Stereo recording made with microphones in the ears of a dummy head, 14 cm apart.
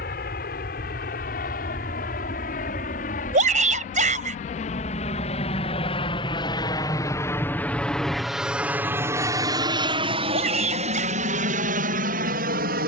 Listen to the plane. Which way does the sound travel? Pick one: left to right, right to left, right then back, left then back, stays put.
left to right.